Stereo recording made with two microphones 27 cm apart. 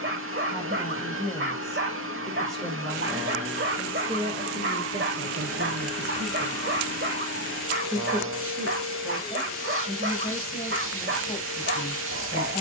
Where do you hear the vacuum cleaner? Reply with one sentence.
In this clip you hear the vacuum cleaner on the right.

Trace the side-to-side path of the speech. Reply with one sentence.
In this clip you hear the speech move from left to right and back again.